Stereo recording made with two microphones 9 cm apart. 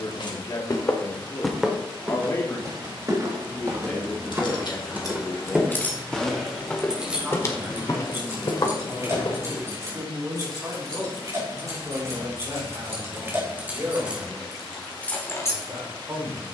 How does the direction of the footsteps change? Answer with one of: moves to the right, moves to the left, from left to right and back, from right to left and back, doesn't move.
from left to right and back.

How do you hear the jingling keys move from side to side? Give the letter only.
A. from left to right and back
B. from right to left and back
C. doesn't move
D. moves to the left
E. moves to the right
A.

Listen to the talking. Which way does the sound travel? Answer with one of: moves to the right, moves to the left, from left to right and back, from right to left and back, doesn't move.
moves to the right.